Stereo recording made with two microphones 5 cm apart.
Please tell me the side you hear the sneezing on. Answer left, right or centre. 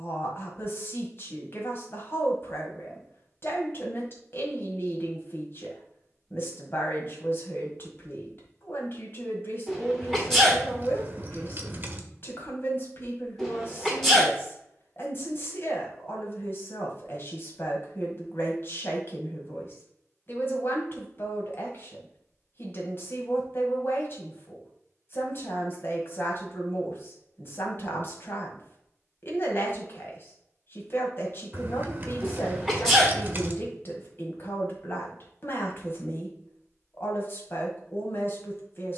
centre.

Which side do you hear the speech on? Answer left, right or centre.
left.